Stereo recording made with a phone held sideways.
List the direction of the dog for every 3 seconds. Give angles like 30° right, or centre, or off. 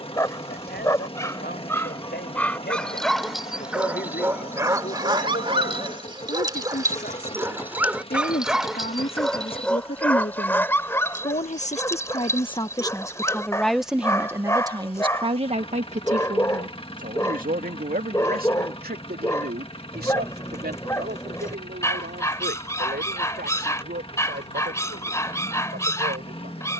10° left, 20° right, 10° right, 10° left, 20° left, 20° left, 20° left, 20° left, 20° left.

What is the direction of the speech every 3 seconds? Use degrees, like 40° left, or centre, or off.
80° left, 80° left, 70° left, 60° left, 10° left, 50° right, 70° right, 70° right, 80° right.